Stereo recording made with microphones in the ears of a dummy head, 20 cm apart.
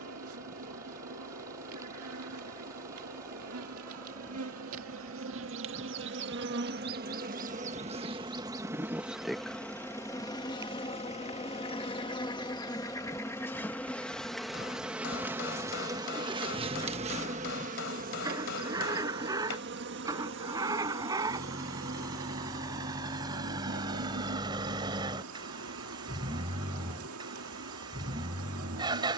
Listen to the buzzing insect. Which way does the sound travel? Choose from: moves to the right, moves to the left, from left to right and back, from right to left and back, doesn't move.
from right to left and back.